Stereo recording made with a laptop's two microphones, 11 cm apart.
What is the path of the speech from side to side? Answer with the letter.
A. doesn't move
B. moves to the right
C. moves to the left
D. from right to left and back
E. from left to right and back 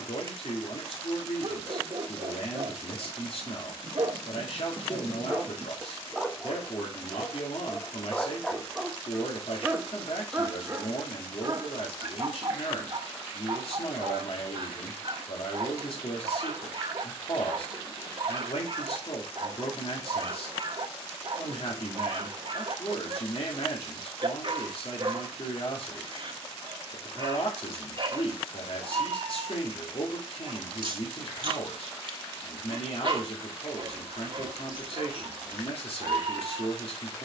A.